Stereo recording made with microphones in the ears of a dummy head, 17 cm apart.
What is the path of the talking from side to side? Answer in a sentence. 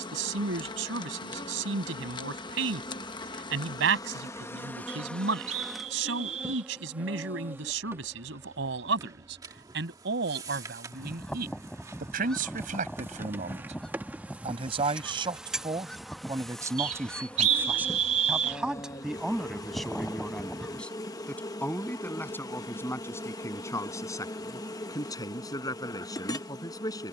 In this clip you hear the talking travel towards the left.